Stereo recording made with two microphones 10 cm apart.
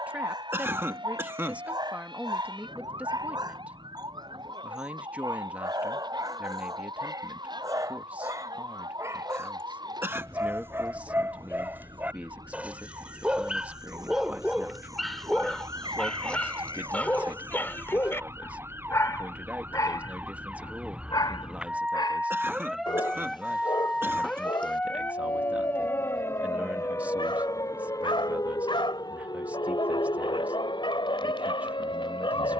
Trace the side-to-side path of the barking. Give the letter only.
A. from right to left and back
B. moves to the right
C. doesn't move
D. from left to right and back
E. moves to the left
E.